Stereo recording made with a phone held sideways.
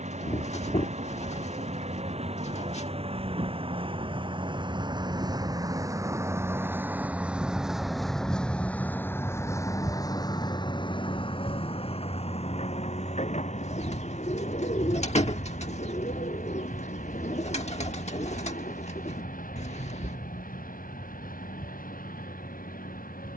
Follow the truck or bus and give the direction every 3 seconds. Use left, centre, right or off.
right, right, centre, left, left, left, left, left.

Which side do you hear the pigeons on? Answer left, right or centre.
left.